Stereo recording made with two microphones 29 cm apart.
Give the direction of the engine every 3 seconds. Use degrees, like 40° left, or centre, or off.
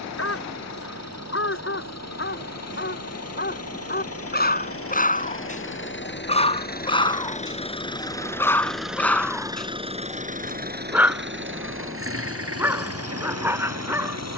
60° left, 50° left, 20° left, 30° right, 60° right.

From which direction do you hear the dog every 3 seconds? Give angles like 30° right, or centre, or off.
50° left, 30° left, 10° left, centre, 10° right.